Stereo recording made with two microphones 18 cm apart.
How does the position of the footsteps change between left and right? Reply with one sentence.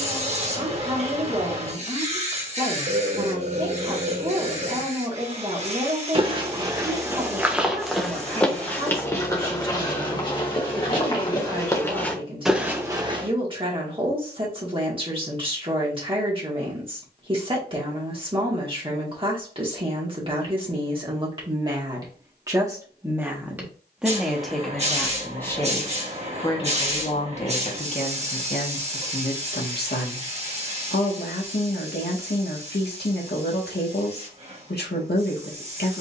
In this clip you hear the footsteps go left and come back.